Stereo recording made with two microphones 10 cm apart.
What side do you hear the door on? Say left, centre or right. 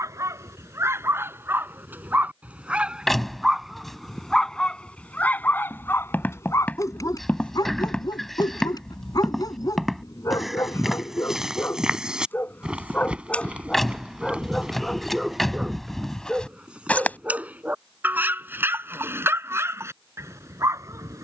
centre.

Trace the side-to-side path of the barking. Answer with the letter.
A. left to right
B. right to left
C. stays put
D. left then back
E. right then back
D.